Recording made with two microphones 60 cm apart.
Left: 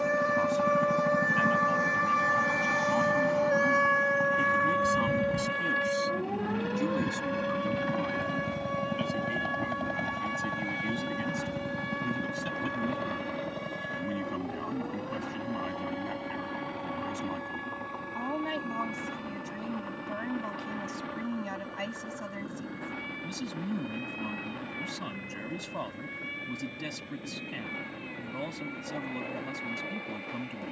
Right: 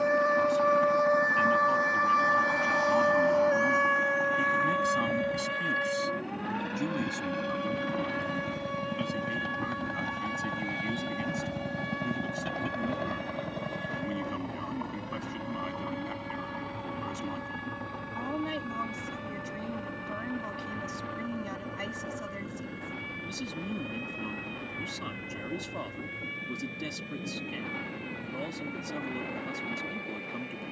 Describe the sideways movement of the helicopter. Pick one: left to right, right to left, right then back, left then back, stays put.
left to right.